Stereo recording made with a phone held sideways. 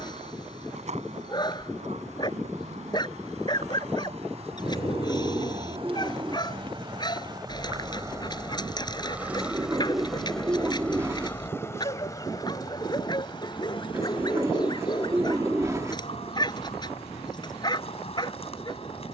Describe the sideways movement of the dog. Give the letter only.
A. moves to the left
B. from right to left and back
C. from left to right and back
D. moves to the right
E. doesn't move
E.